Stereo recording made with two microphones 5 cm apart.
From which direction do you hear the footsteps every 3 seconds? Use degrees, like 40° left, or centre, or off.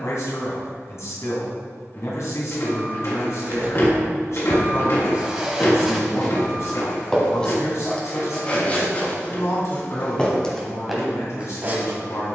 off, 20° right, 20° left, 10° left.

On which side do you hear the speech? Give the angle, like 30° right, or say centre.
60° left.